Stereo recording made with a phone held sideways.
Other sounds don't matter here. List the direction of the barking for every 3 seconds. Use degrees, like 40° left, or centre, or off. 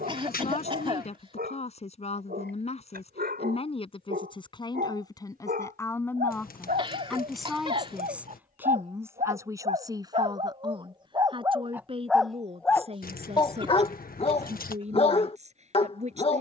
70° right, 70° right, 60° right, 30° right, 20° left, 40° left.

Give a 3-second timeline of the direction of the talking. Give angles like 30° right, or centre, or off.
40° left, 30° left, centre, 20° right, 40° right, 40° right.